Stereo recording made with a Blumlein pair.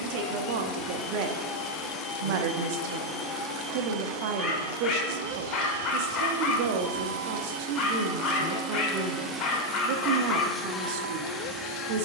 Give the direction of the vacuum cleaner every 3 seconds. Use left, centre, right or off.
left, right, right, centre.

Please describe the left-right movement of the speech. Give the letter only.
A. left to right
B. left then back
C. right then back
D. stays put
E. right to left
D.